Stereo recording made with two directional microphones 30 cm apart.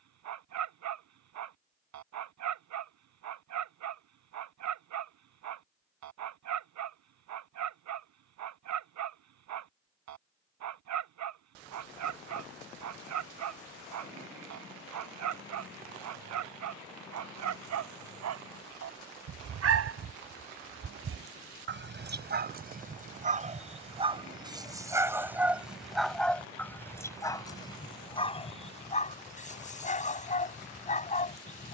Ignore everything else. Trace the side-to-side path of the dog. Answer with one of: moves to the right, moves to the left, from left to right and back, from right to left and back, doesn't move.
moves to the left.